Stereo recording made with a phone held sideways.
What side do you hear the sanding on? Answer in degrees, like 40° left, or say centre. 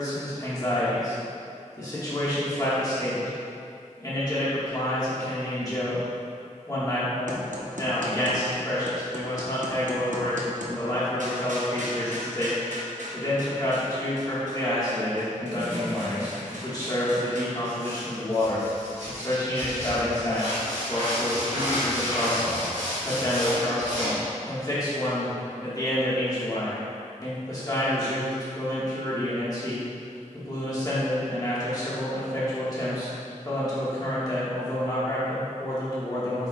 70° right.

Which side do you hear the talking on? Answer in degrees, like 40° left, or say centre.
30° left.